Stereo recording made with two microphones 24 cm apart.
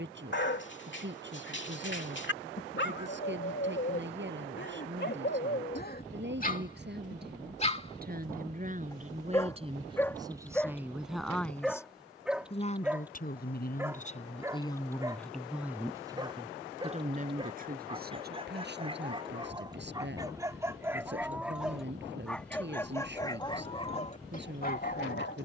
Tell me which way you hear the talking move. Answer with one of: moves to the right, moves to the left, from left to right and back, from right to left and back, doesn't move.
from right to left and back.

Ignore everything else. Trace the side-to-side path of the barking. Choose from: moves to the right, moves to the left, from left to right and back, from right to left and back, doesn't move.
from left to right and back.